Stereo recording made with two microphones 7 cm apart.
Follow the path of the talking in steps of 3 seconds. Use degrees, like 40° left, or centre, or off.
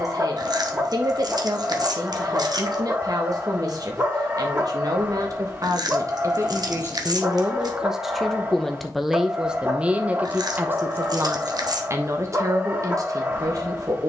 50° right, 50° right, 20° right, 20° right, 50° right.